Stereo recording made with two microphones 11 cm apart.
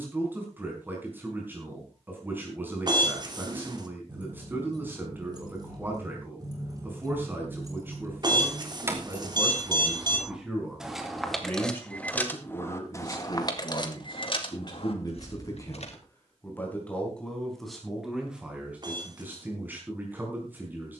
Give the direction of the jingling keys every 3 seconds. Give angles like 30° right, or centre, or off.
off, 40° right, 30° right, 10° right, 40° left, 60° left, off.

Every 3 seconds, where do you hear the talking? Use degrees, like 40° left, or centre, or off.
20° right, 20° right, 20° right, centre, 40° left, 20° left, 10° right.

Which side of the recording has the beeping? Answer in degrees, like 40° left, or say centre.
40° right.